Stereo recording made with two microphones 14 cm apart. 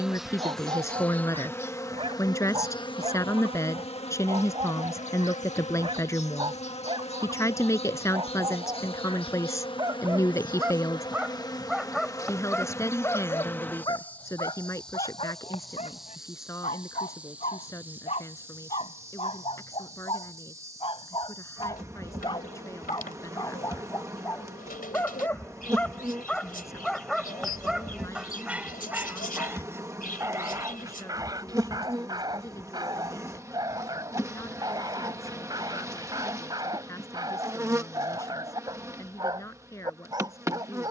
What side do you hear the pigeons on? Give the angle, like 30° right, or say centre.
90° left.